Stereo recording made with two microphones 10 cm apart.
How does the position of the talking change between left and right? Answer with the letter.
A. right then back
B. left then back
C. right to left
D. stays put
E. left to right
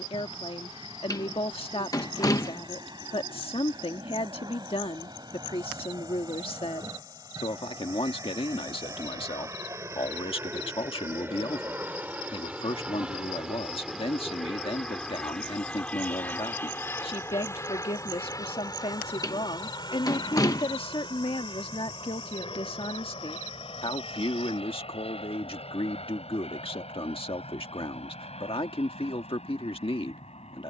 D.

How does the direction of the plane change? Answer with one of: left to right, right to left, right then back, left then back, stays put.
right to left.